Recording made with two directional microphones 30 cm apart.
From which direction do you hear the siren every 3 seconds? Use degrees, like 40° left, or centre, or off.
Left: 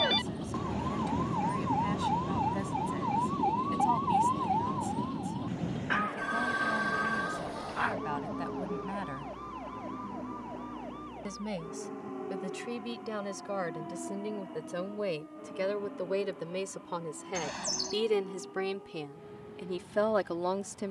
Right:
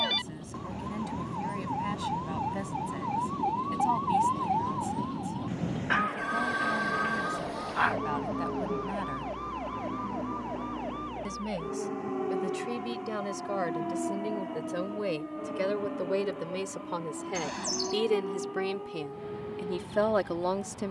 30° left, 10° right, 30° right, 50° right, 60° right, 60° right, 70° right.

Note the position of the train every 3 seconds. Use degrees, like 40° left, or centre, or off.
40° left, 10° left, 20° right, 30° right, 40° right, 50° right, 50° right.